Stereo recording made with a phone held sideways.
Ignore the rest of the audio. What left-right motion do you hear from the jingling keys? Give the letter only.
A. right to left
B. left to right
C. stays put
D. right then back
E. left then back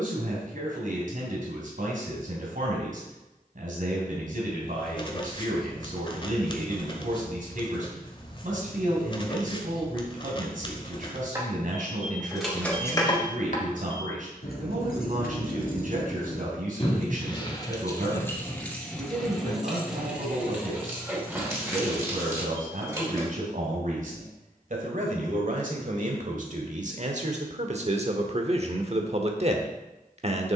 E.